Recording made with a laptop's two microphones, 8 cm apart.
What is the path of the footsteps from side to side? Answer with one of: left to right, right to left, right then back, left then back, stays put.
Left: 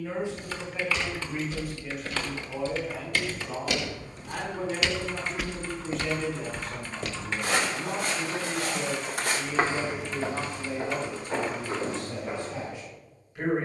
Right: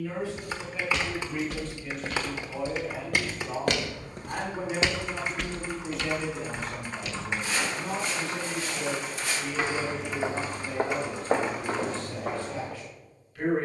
left then back.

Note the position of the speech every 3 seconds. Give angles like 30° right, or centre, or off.
10° left, 10° right, centre, 20° left, 20° left.